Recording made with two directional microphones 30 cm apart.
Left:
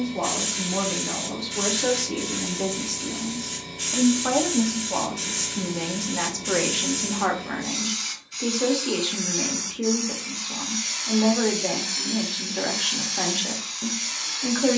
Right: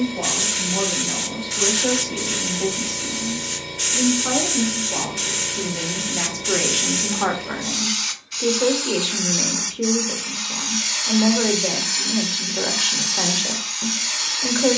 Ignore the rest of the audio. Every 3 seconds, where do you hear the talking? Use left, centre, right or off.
left, left, centre, centre, centre.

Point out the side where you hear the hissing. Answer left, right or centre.
right.